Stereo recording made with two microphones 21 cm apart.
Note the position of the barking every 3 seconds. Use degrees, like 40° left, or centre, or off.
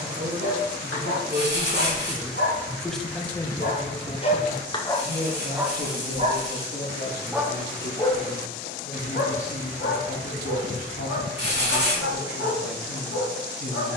70° left, 20° left, centre, 70° left, 70° left.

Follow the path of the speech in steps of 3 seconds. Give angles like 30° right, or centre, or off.
20° right, 30° left, 60° left, 70° left, 70° left.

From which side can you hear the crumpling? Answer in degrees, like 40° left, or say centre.
60° right.